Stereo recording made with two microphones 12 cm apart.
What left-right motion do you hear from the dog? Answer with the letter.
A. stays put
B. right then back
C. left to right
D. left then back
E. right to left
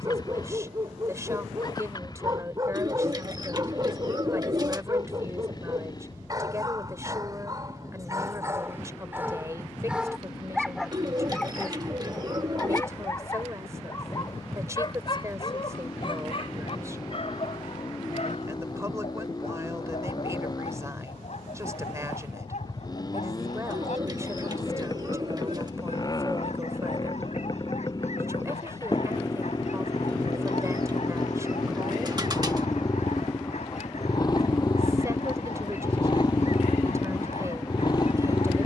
E.